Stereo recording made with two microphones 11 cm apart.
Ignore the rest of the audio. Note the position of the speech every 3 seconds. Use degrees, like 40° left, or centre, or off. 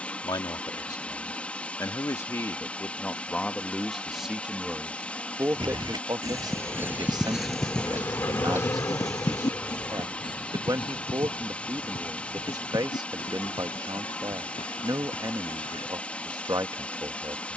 30° left, 10° right, 40° right, 40° right, 40° right, 40° right.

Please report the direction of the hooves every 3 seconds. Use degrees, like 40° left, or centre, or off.
off, 50° right, 10° right, 50° left, 60° left, 60° left.